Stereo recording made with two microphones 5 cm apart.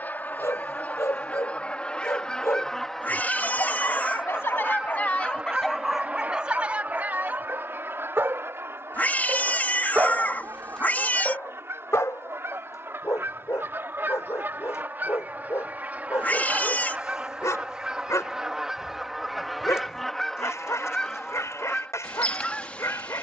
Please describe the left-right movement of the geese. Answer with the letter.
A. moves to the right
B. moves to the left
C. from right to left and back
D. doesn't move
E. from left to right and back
E.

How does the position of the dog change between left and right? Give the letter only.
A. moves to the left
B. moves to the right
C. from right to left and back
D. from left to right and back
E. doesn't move
D.